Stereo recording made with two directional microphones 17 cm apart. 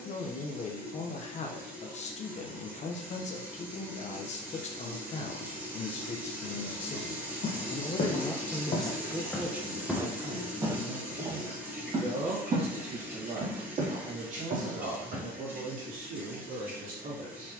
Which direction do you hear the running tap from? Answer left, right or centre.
centre.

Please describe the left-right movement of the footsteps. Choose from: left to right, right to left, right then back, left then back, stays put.
left to right.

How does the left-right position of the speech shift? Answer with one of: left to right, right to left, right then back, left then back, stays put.
left to right.